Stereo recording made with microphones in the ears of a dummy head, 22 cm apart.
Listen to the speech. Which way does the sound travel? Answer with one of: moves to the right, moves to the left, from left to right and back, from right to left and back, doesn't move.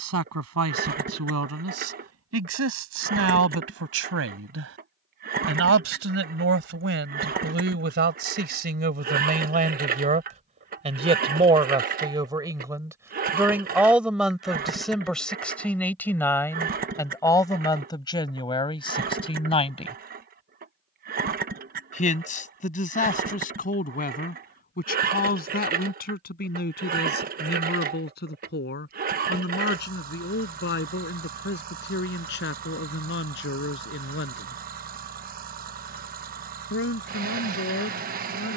moves to the left.